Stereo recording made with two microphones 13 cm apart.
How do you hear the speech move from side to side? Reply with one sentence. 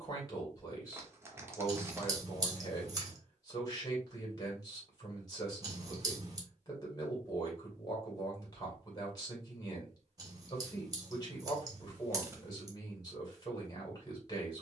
In this clip you hear the speech stay in one place.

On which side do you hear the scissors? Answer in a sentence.
You can hear the scissors on the right.